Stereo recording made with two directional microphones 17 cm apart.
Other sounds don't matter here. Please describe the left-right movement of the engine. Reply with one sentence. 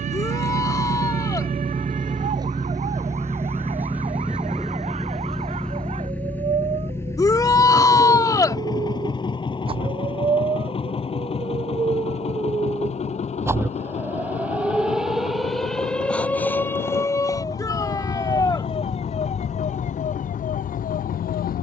In this clip you hear the engine go from the right side to the left.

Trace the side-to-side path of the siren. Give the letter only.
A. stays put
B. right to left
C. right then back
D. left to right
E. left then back
B.